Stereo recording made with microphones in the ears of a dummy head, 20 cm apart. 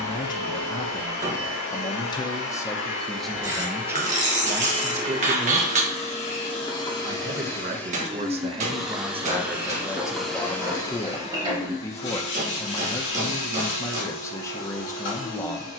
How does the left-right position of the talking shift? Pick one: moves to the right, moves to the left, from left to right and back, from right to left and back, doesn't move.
from left to right and back.